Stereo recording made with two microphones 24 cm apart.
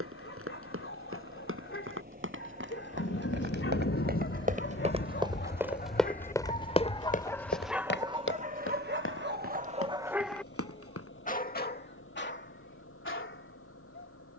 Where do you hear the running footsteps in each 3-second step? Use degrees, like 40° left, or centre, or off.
60° right, 30° right, 40° left, 70° left, off.